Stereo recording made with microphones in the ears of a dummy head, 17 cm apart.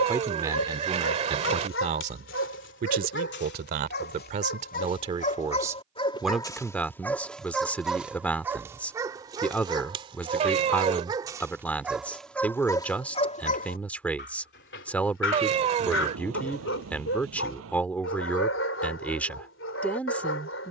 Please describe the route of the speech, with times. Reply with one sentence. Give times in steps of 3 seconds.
In this clip you hear the speech on the right from 0 s and in the centre from 6 s.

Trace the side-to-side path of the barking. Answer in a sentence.
In this clip you hear the barking go right and come back.